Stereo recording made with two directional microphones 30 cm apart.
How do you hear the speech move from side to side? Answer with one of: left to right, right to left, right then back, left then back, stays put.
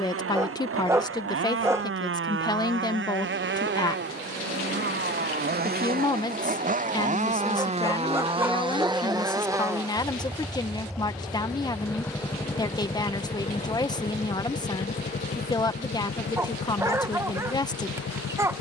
stays put.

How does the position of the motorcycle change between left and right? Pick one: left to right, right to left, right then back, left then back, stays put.
right to left.